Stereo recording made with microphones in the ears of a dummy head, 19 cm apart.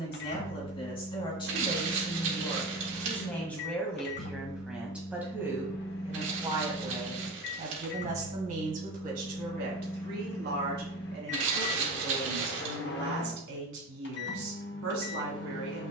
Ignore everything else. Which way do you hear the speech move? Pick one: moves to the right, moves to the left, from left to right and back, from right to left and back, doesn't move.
moves to the right.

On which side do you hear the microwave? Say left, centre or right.
left.